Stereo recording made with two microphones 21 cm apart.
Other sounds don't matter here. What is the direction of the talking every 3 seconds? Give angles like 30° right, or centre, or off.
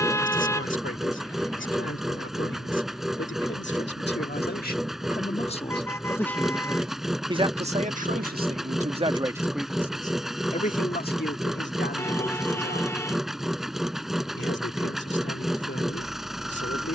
60° left, 40° left, 20° right, 30° left, 50° left, 50° left.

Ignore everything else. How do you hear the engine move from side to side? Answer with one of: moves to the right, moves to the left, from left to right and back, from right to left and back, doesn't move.
doesn't move.